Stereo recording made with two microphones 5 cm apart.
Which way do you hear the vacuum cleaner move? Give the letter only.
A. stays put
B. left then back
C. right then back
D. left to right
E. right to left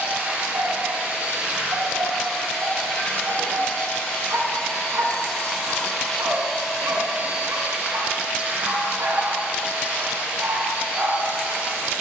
B.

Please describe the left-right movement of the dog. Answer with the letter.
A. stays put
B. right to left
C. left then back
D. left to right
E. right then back
A.